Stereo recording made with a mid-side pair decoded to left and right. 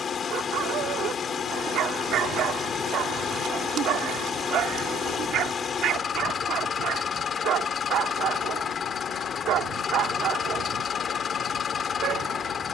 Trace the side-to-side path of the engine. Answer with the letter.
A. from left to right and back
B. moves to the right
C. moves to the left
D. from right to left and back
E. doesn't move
E.